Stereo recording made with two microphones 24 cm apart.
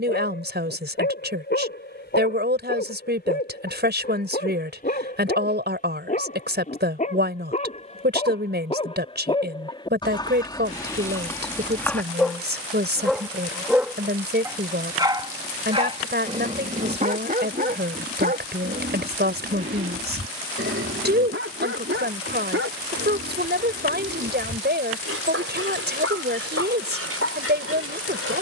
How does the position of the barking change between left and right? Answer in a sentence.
You can hear the barking travel towards the right.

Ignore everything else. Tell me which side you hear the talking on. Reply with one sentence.
You can hear the talking on the right.